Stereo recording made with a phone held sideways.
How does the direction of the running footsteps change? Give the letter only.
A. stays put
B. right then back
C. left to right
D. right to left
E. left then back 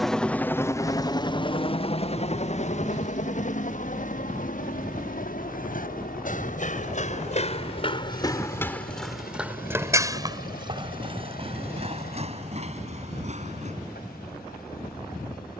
C.